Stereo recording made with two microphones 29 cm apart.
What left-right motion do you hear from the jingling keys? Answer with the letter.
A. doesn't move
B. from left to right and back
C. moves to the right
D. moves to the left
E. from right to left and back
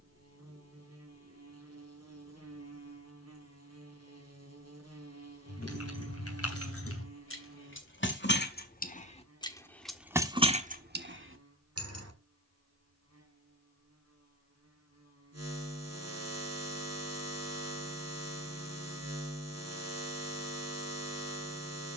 C.